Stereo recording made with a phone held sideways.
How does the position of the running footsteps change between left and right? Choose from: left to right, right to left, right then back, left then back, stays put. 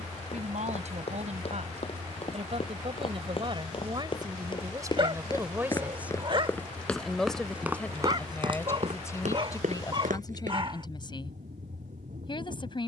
left to right.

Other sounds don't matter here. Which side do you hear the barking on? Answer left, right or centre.
right.